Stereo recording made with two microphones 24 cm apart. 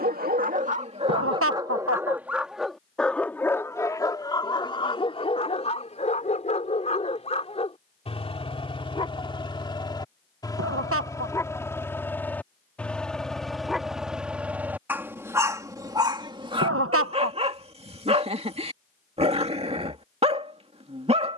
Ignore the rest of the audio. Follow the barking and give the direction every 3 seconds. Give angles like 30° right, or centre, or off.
20° right, 20° left, 30° left, 20° left, centre, 20° right, 30° right.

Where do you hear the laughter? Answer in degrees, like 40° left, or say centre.
70° right.